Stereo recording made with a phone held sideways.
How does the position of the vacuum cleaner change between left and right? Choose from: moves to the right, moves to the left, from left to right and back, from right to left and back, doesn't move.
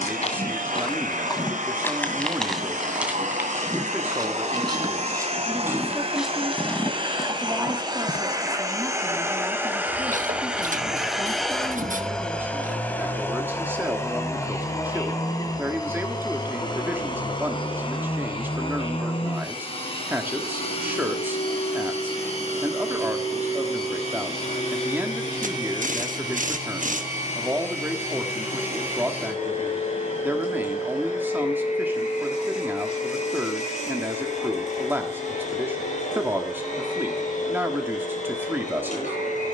moves to the left.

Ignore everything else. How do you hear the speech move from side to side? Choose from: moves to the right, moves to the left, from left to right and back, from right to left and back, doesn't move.
doesn't move.